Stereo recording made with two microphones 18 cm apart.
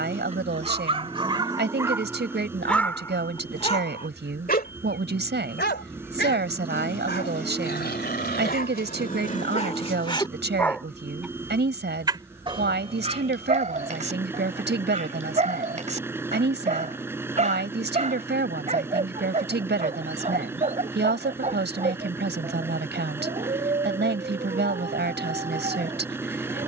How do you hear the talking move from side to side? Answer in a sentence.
You can hear the talking stay put.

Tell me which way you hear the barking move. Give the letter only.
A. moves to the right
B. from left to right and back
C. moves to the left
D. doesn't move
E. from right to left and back
E.